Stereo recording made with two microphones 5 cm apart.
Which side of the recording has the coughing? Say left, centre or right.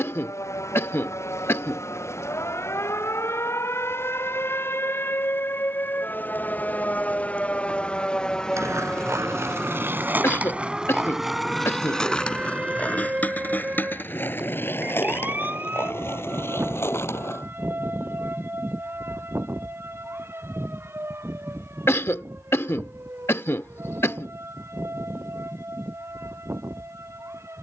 left.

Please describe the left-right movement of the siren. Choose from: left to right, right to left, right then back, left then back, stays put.
left to right.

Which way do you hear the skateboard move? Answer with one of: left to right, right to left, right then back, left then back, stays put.
right to left.